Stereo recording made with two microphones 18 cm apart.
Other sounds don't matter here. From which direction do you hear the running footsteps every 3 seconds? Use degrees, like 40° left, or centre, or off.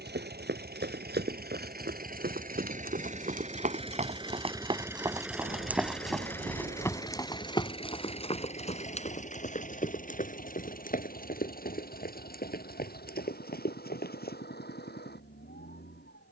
70° right, 30° right, 20° left, 50° left, 60° left, off.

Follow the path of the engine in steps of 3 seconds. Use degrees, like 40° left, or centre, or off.
60° right, 20° right, 30° left, 50° left, 60° left, 70° left.